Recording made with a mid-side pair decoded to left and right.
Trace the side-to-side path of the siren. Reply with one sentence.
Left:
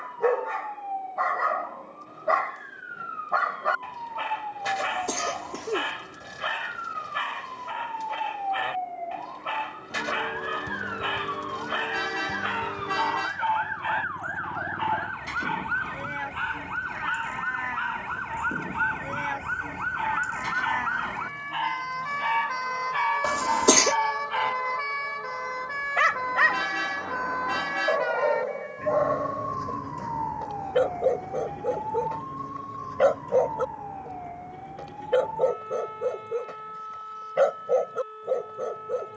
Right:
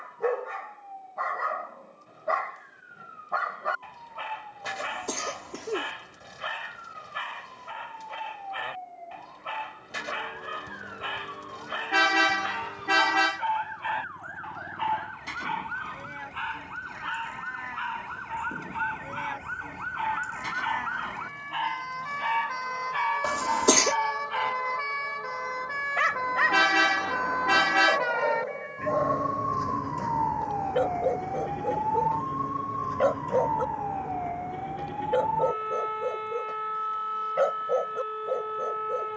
In this clip you hear the siren move to the right.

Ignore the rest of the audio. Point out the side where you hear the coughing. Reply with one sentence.
In this clip you hear the coughing in the centre.